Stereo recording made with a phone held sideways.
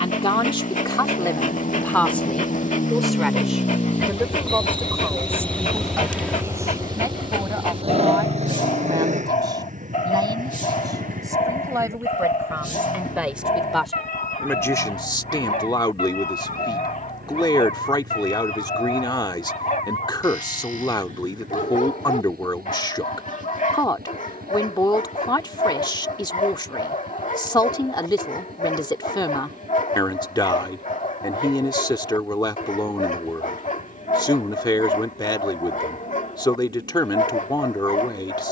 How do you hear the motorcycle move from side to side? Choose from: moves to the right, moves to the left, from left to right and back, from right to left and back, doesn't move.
moves to the right.